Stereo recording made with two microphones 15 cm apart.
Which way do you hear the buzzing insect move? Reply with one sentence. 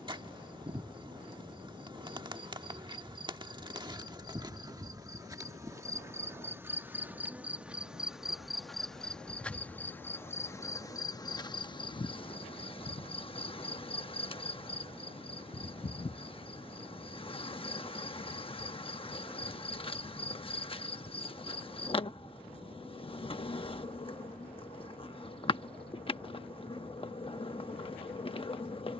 You can hear the buzzing insect go from the right side to the left.